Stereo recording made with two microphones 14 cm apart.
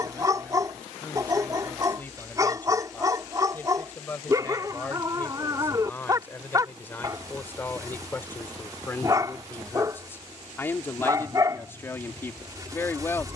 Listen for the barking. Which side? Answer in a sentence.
You can hear the barking on the right.